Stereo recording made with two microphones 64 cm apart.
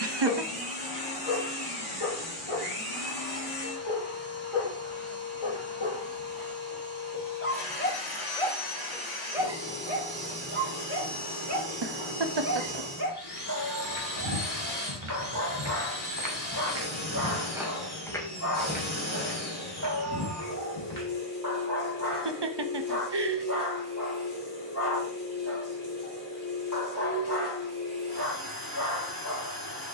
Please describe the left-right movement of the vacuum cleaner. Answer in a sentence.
In this clip you hear the vacuum cleaner stay in one place.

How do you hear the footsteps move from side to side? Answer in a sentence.
In this clip you hear the footsteps go from the right side to the left.